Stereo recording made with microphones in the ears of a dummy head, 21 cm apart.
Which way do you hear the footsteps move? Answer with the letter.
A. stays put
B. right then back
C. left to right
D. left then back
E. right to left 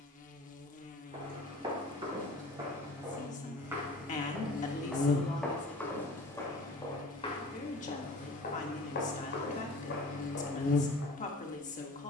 E.